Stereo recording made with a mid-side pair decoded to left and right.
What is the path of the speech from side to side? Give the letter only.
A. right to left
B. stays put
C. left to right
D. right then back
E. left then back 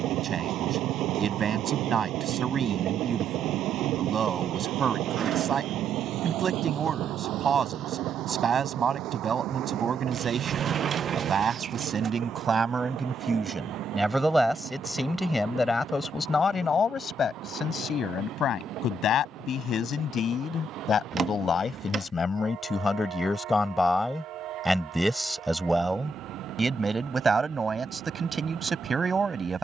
E.